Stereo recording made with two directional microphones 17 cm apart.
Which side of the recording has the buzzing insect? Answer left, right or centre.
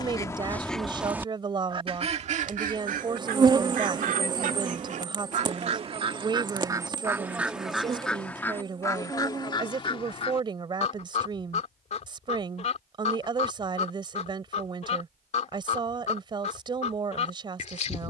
right.